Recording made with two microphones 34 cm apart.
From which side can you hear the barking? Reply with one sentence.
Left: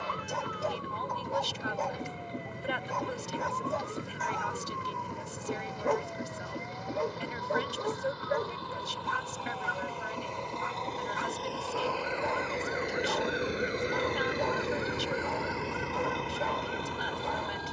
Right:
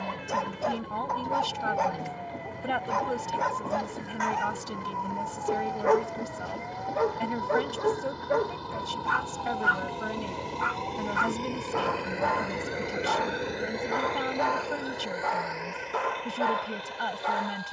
In this clip you hear the barking on the right.